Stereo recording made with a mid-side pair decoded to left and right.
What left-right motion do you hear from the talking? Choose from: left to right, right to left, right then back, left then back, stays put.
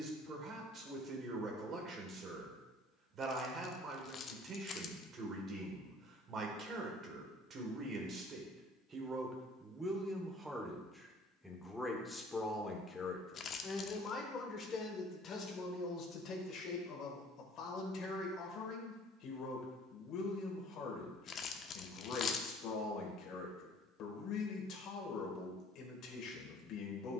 right to left.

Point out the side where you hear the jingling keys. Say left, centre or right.
left.